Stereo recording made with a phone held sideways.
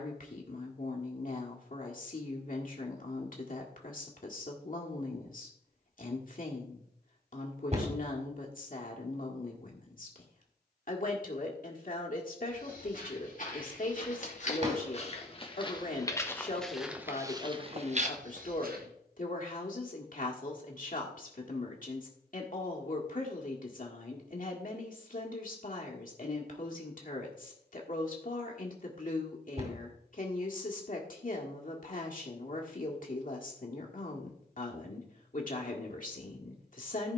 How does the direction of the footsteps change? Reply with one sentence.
You can hear the footsteps go from the left side to the right.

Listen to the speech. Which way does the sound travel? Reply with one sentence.
In this clip you hear the speech stay put.